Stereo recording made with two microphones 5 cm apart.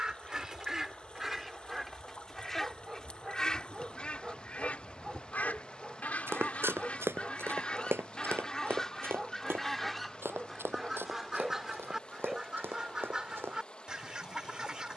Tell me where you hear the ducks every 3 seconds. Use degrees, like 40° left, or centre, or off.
centre, 30° left, 20° left, centre, 20° right.